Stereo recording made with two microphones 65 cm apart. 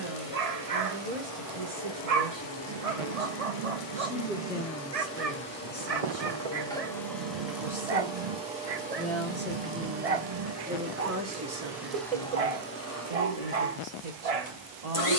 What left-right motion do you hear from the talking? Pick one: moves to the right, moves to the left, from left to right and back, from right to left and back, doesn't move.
from right to left and back.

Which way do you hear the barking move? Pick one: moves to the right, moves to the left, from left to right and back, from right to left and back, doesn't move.
doesn't move.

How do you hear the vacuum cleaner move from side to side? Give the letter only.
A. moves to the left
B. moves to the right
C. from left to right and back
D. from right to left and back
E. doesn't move
C.